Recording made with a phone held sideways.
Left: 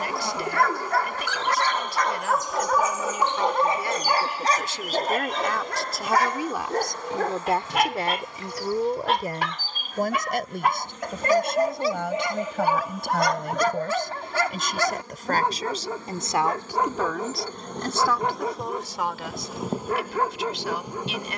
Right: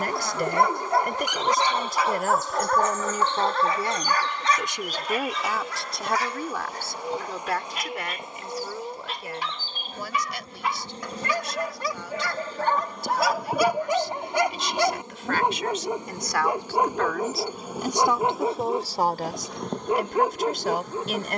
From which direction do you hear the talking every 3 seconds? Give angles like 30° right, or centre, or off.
50° right, 20° right, 30° left, 50° left, 60° left, 20° left, 40° right.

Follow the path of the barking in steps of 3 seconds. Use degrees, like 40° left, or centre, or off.
10° right, 40° left, 70° left, 50° left, centre, 20° right, 20° right.